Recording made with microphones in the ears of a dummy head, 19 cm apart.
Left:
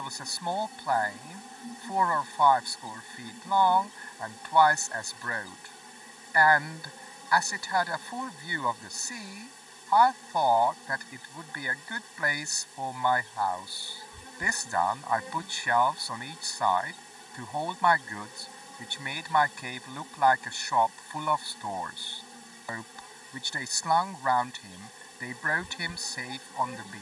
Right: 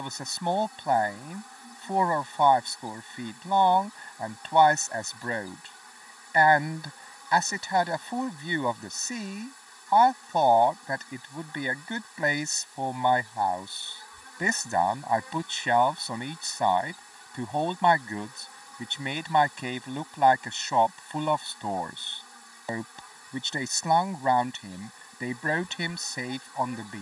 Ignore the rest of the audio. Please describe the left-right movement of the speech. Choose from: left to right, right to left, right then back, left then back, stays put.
stays put.